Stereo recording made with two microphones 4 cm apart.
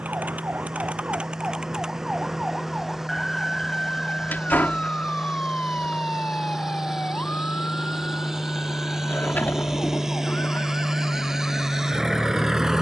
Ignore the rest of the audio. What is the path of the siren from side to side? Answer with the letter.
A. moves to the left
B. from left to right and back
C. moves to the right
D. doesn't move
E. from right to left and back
A.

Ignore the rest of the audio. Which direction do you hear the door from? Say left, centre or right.
left.